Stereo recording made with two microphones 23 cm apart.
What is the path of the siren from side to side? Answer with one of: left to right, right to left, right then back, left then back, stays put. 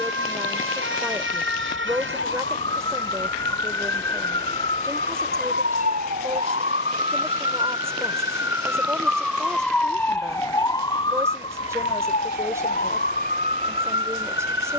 right to left.